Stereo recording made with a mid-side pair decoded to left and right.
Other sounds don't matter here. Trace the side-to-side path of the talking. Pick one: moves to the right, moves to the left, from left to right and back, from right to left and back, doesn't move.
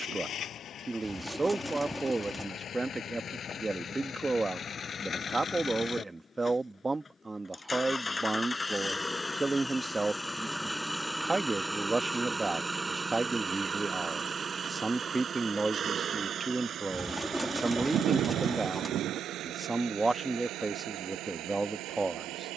doesn't move.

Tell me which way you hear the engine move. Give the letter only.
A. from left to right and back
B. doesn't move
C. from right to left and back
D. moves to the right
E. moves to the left
D.